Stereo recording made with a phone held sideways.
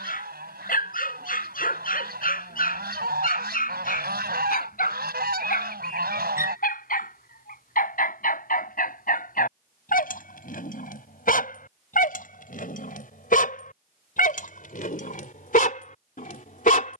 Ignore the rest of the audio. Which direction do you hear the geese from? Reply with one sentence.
You can hear the geese on the right.